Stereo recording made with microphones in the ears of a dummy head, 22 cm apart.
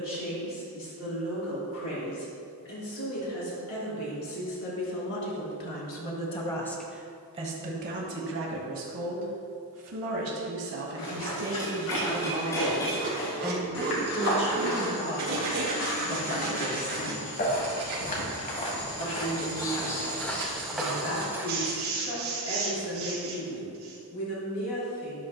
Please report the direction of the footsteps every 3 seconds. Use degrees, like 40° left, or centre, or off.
off, off, off, 70° left, 70° left, 50° left, 20° left, 10° right, off.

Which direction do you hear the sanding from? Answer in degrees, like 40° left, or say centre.
70° right.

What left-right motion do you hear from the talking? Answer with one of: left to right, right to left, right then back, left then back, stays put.
right then back.